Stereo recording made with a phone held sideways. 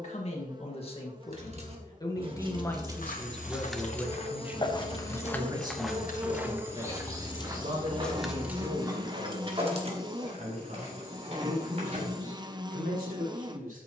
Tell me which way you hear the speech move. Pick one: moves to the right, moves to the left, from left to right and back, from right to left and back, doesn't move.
moves to the right.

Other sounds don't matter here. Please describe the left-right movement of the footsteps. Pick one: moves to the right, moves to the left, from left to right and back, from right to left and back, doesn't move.
moves to the right.